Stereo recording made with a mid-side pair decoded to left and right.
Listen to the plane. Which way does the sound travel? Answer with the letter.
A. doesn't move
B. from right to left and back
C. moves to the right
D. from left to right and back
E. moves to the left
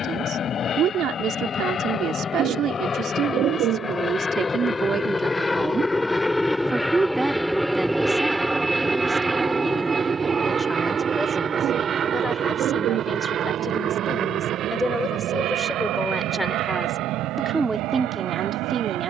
C.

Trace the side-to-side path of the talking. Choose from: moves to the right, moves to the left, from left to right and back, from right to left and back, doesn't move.
from right to left and back.